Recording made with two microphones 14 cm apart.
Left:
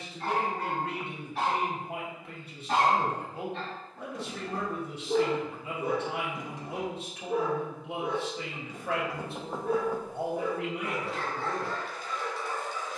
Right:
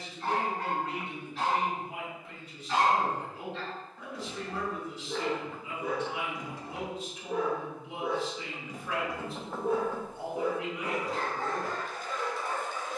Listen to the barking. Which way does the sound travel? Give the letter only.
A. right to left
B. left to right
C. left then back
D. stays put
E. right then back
B.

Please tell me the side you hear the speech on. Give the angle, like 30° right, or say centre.
70° left.